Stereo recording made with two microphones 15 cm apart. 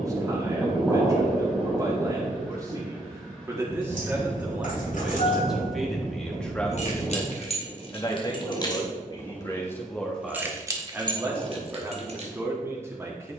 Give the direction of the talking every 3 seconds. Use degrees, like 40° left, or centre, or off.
20° right, 10° right, 20° left, centre, 20° right.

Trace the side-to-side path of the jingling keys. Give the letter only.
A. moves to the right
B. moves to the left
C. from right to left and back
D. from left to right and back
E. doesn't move
A.